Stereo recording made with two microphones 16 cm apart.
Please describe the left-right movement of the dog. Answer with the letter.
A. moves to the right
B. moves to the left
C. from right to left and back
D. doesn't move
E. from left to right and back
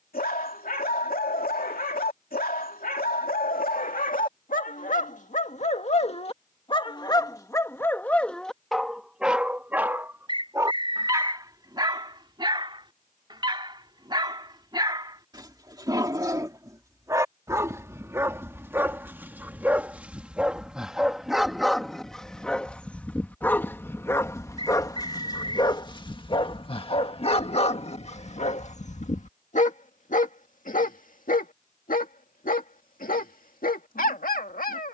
E.